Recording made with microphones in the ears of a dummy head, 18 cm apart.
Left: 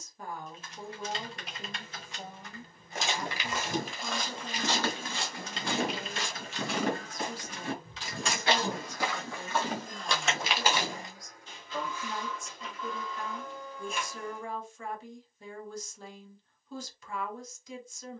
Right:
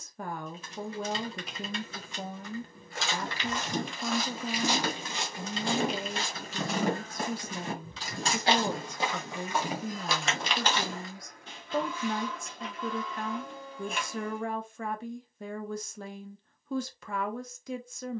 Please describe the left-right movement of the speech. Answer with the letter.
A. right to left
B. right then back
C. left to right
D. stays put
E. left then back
D.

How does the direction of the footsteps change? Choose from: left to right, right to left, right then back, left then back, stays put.
right then back.